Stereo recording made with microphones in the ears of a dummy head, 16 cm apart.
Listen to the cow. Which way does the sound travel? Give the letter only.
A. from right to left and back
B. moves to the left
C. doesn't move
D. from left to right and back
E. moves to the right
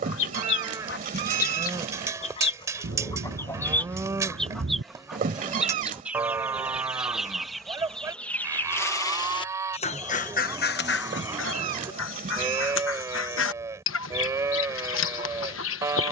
C.